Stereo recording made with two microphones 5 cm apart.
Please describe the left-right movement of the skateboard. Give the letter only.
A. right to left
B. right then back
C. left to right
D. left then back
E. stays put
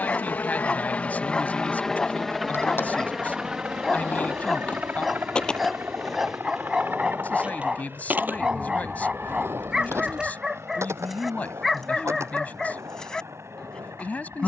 C.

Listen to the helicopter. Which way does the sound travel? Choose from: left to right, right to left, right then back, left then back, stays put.
left to right.